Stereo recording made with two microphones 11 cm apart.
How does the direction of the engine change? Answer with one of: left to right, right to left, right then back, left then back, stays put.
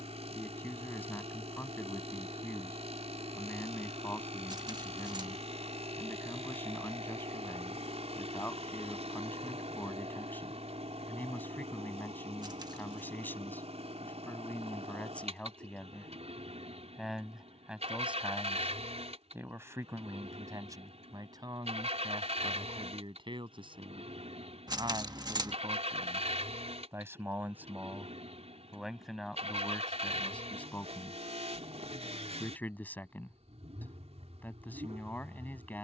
stays put.